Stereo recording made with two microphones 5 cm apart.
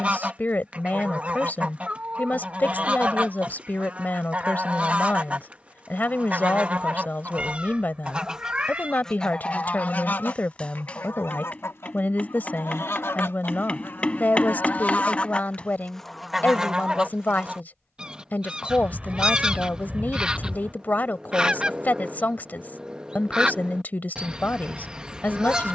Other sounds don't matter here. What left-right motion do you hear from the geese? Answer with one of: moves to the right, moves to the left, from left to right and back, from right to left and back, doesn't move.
from right to left and back.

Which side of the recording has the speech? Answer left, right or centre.
left.